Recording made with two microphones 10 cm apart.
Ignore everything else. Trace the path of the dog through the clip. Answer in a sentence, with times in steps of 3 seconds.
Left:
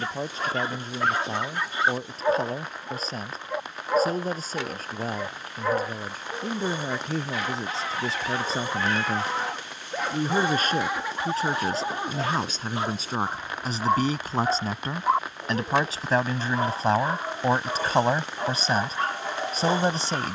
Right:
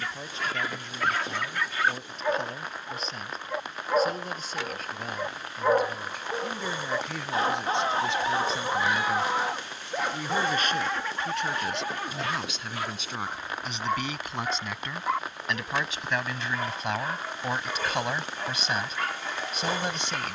You can hear the dog on the left from 0 s, in the centre from 3 s, on the right from 6 s, in the centre from 9 s and on the left from 12 s.